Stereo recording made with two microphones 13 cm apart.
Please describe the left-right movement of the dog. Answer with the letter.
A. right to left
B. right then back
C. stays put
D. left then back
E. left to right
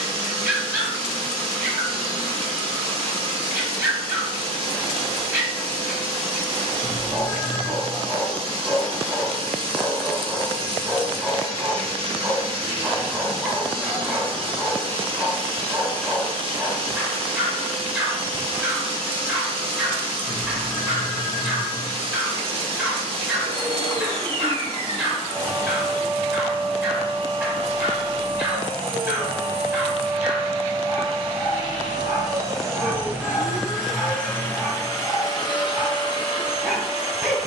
C.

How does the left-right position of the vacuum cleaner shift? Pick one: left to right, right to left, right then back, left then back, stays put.
right to left.